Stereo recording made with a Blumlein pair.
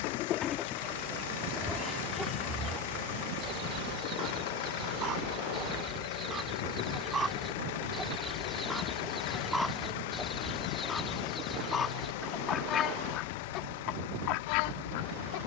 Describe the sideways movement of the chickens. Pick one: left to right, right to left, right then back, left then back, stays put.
right then back.